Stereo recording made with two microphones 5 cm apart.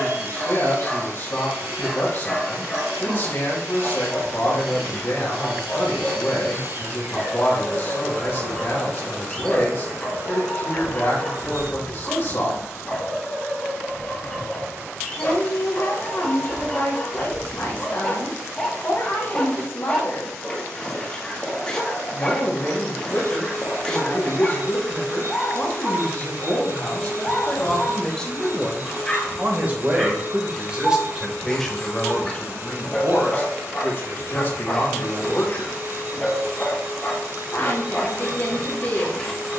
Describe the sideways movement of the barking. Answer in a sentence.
You can hear the barking stay put.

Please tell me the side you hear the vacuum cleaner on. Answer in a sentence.
You can hear the vacuum cleaner on the right.